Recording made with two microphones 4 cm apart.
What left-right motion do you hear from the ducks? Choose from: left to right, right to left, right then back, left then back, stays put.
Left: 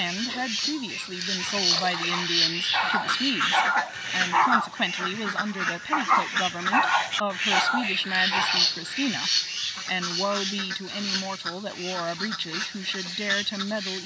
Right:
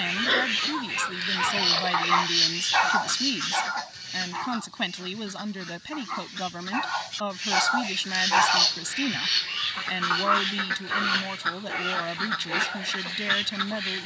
left then back.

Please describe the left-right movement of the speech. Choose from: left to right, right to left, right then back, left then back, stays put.
stays put.